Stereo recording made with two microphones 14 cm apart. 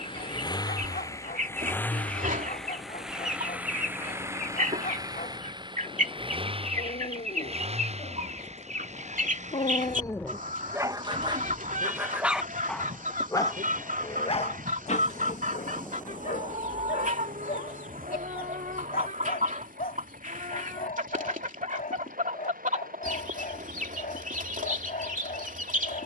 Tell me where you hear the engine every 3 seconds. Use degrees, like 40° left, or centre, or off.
20° left, 20° right, 40° right, 60° right, 60° right, 70° right, 70° right, 70° right, 70° right.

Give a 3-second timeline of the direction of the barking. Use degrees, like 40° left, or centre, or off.
80° left, 80° left, 70° left, centre, 20° left, 60° left, 70° left, 70° left, 70° left.